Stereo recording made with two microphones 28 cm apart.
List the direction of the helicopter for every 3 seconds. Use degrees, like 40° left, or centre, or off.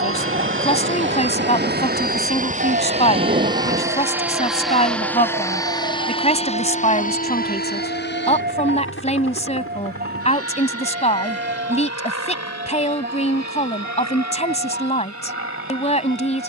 40° right, centre, 30° left, 50° left, 60° left, 60° left.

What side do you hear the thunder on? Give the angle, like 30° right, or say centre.
30° right.